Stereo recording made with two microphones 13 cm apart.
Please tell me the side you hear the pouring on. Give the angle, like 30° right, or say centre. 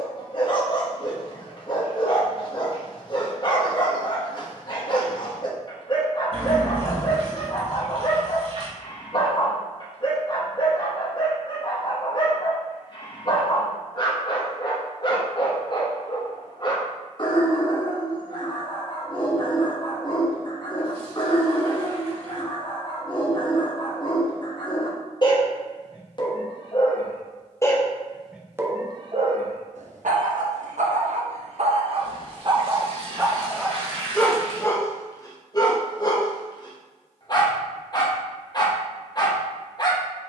50° right.